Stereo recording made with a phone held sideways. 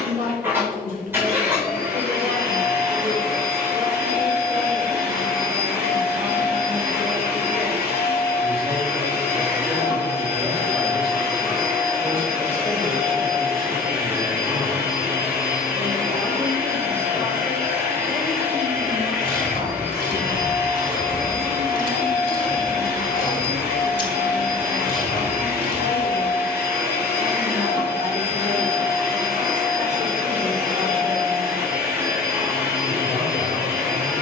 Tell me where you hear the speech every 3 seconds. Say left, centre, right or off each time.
right, right, right, centre, left, left, right, right, right, right, right, right.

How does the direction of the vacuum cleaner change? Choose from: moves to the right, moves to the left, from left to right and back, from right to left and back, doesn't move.
doesn't move.